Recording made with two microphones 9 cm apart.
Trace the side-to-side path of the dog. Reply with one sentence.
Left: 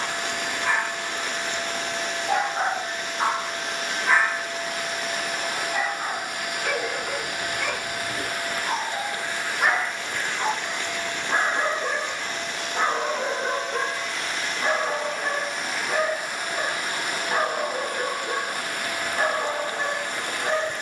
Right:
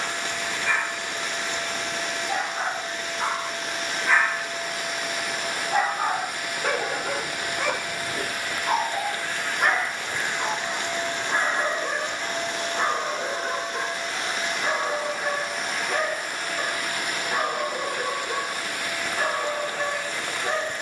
In this clip you hear the dog go right and come back.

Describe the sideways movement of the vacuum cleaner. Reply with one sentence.
You can hear the vacuum cleaner go right and come back.